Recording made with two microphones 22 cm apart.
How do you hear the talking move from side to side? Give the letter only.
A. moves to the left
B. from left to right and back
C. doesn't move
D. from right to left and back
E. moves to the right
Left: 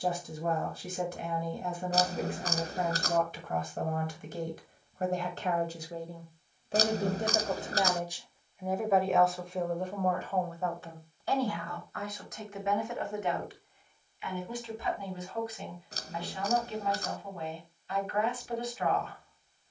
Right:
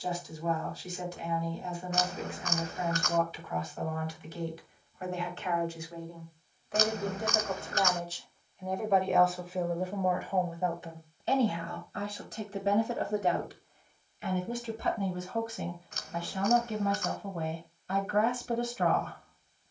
E.